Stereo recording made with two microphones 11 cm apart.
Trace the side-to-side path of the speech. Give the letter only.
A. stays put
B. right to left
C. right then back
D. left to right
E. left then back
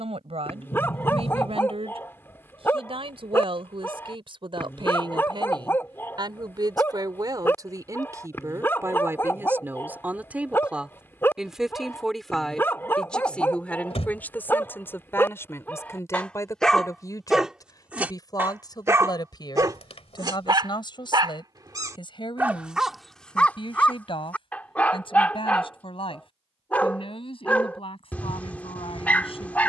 B.